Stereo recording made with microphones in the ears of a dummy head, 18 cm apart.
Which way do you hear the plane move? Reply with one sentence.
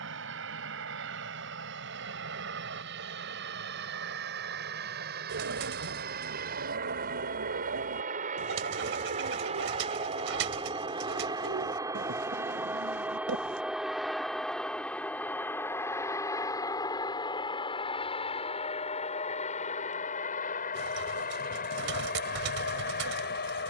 You can hear the plane travel towards the left.